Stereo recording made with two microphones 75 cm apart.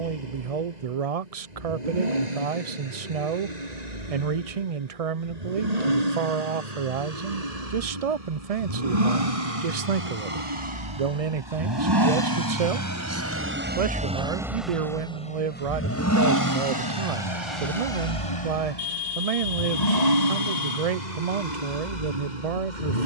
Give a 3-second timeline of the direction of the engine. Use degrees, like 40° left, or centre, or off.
60° right, 60° right, 50° right, 40° right, 10° right, 30° left, 60° left, 70° left.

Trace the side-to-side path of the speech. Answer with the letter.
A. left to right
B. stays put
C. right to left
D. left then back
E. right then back
B.